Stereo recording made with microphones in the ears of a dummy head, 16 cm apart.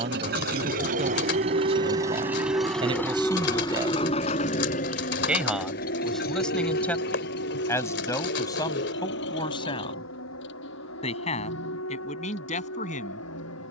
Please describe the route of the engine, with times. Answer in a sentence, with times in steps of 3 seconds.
In this clip you hear the engine on the right from 0 s and on the left from 3 s.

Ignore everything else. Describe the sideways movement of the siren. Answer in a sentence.
In this clip you hear the siren travel towards the left.